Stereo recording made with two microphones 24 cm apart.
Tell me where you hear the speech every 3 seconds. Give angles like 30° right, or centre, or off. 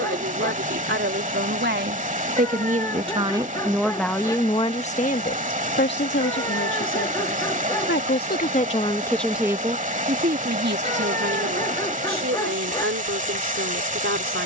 50° right, 20° left, 50° left, 40° right, 60° right.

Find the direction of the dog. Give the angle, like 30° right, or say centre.
20° left.